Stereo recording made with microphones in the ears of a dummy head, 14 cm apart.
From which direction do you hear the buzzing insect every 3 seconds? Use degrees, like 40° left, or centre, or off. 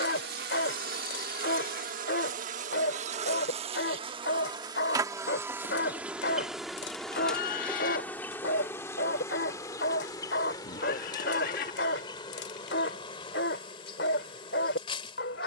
60° right, 30° right, 10° left, 30° left, 30° left.